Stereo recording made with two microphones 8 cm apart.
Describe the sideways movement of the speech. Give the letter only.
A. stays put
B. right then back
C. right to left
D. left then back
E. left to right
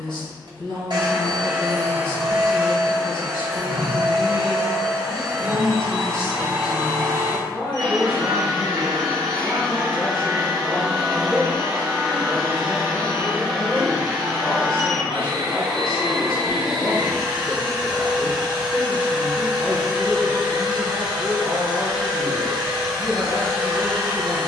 A.